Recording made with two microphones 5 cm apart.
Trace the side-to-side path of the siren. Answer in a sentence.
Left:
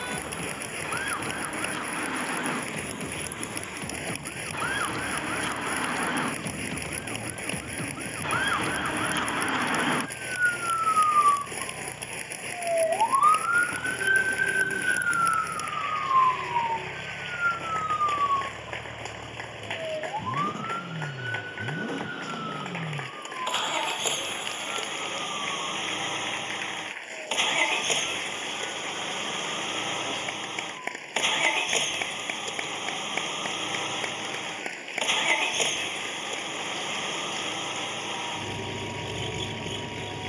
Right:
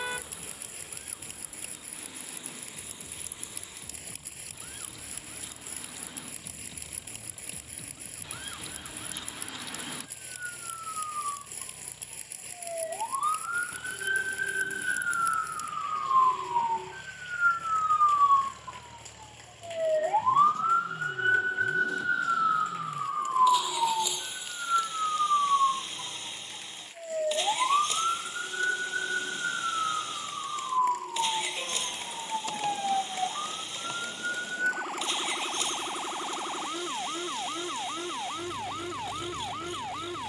In this clip you hear the siren travel towards the right.